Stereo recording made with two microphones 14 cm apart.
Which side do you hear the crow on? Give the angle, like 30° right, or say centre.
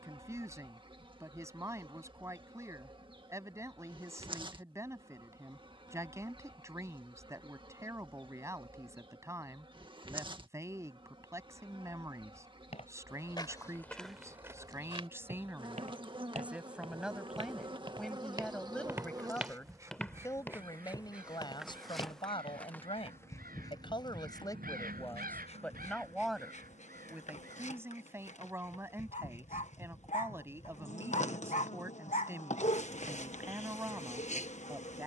70° right.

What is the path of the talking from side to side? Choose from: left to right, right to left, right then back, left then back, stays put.
left then back.